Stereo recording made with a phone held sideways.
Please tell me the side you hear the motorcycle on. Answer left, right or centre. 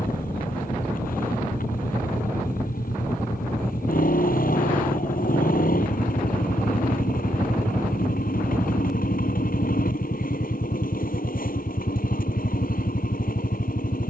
left.